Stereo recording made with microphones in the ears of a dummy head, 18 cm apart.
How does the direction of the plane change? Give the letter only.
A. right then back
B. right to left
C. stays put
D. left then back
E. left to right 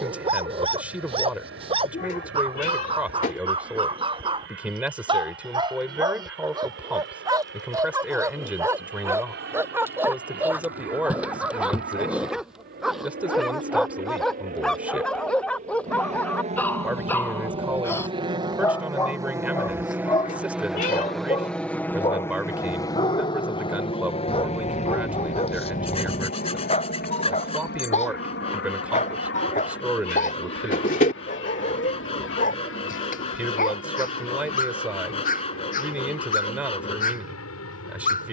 B.